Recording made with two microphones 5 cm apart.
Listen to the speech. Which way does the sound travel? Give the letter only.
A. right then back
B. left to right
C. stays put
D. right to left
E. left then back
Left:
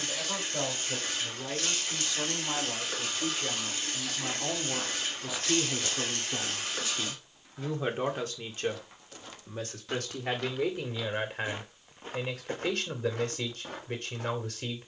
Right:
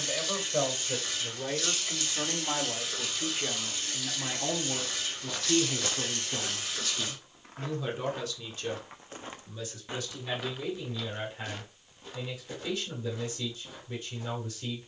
D.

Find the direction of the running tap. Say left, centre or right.
left.